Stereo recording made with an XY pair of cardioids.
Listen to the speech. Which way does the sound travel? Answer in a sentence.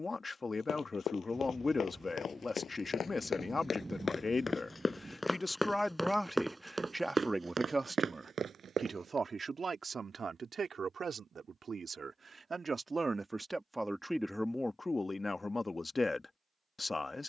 In this clip you hear the speech go right and come back.